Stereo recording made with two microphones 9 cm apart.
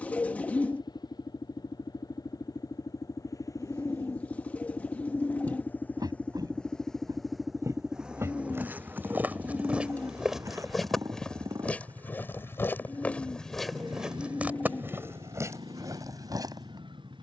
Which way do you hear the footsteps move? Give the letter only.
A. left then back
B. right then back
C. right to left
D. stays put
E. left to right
A.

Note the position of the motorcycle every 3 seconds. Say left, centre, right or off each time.
left, left, centre, right, right, right.